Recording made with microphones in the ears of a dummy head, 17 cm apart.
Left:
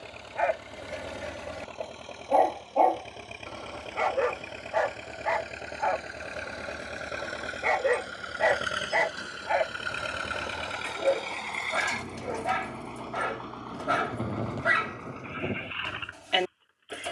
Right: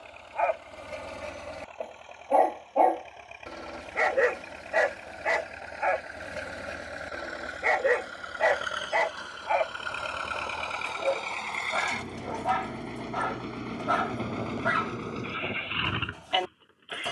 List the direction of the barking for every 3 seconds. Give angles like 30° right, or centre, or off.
10° left, 20° right, 10° right, 20° left, 30° left, 30° left.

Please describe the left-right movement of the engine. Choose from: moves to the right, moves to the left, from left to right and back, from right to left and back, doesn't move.
moves to the right.